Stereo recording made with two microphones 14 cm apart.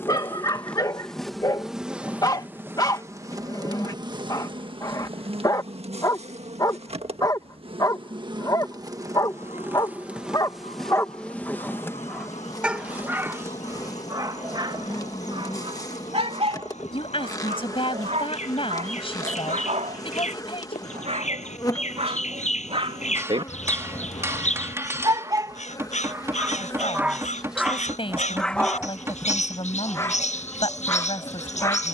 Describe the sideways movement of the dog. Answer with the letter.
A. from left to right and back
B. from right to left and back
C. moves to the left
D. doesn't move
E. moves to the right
A.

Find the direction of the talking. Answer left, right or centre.
left.